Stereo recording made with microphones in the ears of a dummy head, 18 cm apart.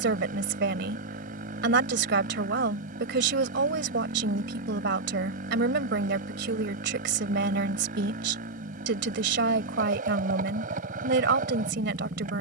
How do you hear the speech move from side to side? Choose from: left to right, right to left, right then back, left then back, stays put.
stays put.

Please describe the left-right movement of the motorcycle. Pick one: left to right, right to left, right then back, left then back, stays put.
stays put.